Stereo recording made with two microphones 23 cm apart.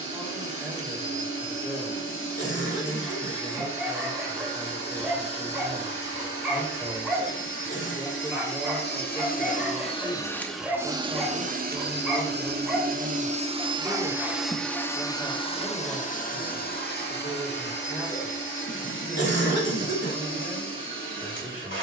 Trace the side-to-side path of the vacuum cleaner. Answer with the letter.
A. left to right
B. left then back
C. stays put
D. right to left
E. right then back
E.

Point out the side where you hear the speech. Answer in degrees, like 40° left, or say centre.
10° right.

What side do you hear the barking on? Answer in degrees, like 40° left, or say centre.
centre.